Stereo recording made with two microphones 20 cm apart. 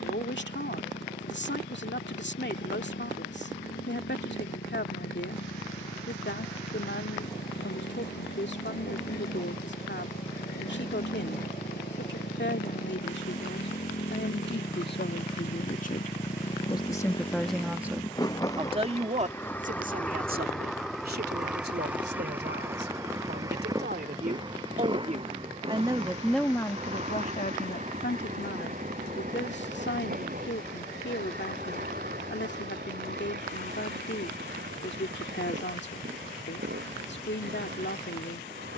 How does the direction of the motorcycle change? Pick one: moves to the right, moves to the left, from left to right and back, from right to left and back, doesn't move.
moves to the right.